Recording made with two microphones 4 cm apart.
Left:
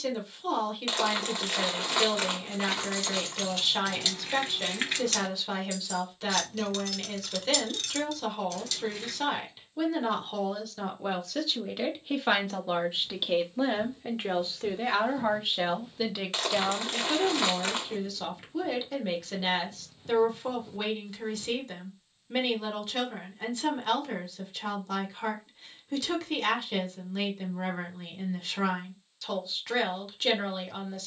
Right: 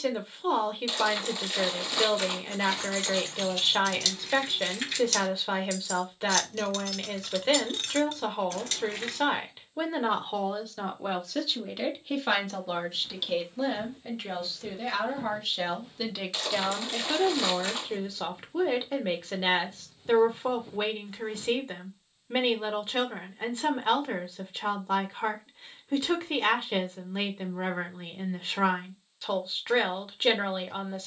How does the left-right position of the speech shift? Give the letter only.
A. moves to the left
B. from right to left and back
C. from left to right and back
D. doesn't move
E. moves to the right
B.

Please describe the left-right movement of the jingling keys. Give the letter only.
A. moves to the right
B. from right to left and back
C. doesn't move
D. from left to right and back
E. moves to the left
B.